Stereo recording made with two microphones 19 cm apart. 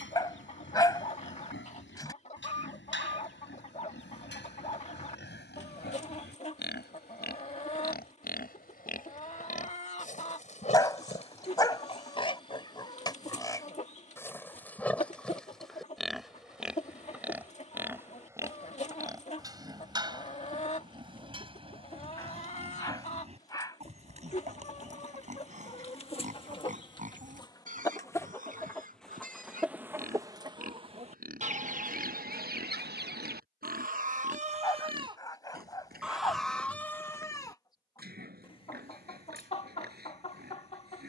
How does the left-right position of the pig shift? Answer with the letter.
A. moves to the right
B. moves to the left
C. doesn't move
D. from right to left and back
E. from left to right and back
A.